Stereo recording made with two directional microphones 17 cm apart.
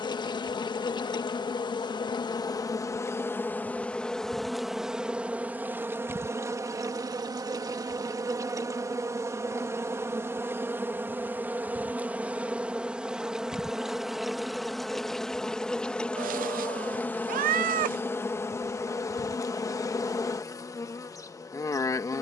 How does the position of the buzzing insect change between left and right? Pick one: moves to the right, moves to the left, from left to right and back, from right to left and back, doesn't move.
from left to right and back.